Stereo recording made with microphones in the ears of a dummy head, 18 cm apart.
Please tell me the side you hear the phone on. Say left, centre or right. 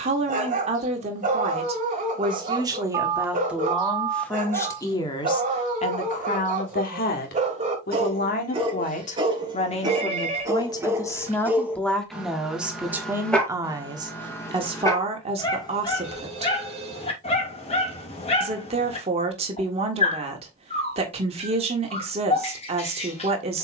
right.